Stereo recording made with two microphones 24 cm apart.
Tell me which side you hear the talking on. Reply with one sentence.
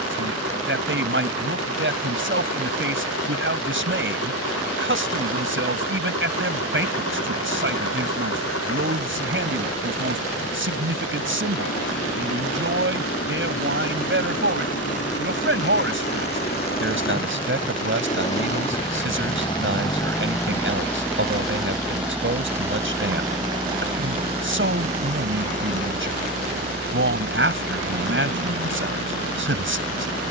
You can hear the talking on the right.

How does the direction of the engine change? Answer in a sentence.
In this clip you hear the engine move from left to right.